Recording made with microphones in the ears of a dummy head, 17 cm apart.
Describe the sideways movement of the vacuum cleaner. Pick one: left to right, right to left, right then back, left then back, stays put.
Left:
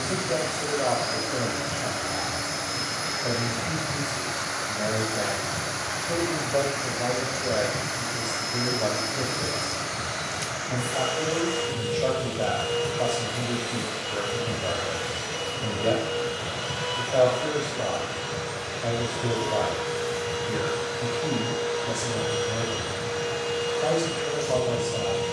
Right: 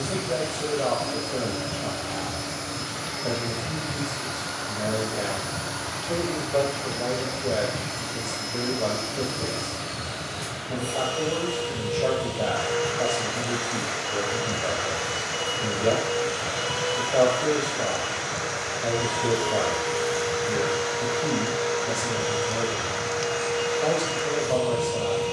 right then back.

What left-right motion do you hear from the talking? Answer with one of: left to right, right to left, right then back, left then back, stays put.
stays put.